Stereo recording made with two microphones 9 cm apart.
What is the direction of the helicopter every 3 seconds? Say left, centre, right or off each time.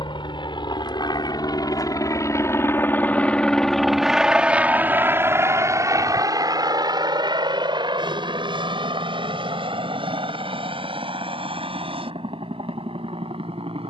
left, centre, right, right, right.